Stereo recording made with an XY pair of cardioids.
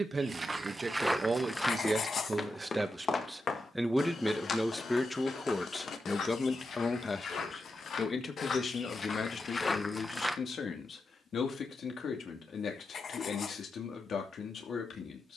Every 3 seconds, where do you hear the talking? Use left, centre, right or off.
right, centre, left, left, left.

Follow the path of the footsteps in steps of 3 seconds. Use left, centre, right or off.
centre, left, left, left, off.